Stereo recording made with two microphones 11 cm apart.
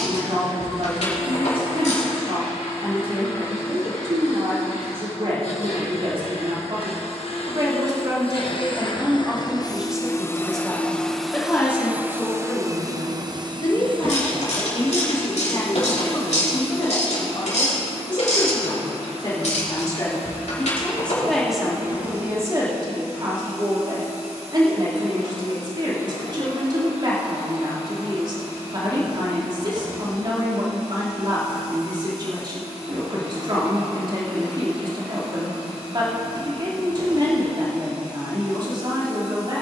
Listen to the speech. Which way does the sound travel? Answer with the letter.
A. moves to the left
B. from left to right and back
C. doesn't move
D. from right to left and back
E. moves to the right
D.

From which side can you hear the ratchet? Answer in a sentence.
In this clip you hear the ratchet on the left.